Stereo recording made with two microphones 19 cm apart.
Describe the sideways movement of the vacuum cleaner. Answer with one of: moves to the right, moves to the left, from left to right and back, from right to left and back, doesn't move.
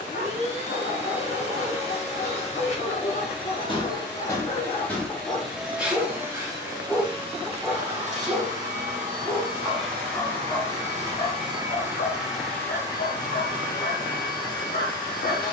from left to right and back.